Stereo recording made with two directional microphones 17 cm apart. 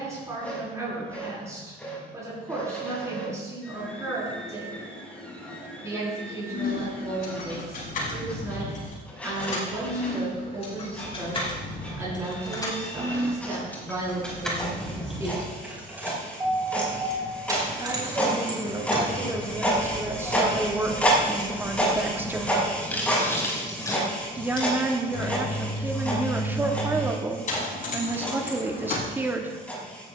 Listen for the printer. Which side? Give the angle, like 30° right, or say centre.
10° left.